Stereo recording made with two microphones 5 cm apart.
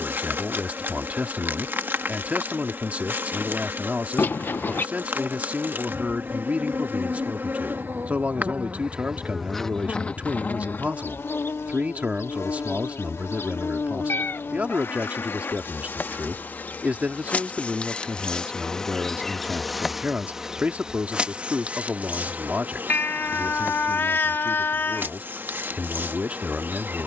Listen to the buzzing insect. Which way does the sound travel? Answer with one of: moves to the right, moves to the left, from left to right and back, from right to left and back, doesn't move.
from right to left and back.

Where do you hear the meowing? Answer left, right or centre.
left.